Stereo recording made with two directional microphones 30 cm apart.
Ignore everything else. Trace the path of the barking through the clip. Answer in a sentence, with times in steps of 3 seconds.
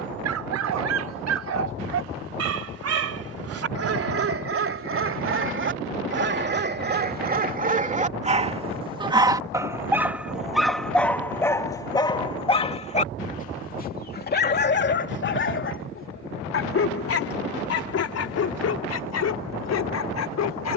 You can hear the barking on the right from 0 s, in the centre from 9 s and on the left from 12 s.